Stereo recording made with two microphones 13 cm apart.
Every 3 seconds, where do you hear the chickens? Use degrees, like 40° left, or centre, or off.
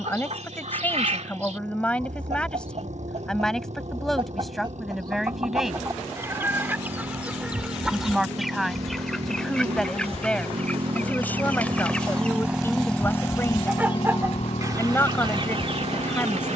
60° right, 40° right, 10° right, 10° left, 20° right, 50° right.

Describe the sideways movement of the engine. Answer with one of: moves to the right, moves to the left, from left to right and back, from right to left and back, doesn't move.
moves to the left.